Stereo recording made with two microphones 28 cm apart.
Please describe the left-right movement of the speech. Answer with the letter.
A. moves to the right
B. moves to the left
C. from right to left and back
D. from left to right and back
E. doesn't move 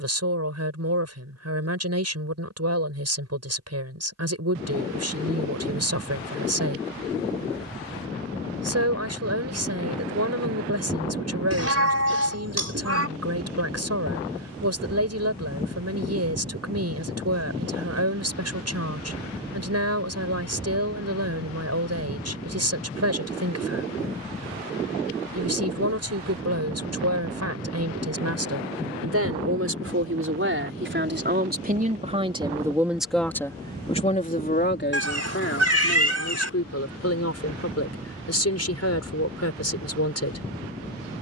B.